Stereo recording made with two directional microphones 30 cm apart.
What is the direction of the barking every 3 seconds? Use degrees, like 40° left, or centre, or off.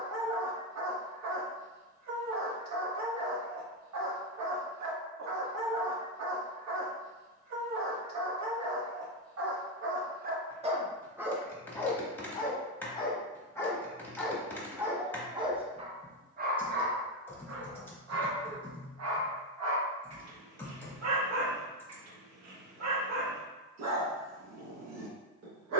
60° right, 60° right, 60° right, 30° right, 10° left, 30° right, 60° right, 60° right, 60° right.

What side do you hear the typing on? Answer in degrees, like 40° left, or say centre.
10° left.